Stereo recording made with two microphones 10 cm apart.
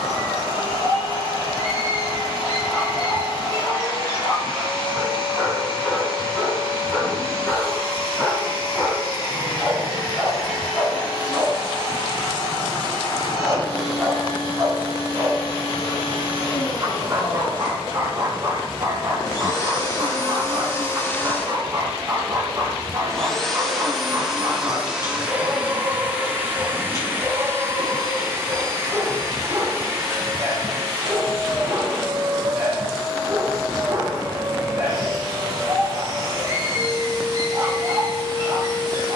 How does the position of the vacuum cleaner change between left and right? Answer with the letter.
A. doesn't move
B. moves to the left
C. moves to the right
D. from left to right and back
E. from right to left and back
C.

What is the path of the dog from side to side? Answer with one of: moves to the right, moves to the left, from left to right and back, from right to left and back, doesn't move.
moves to the right.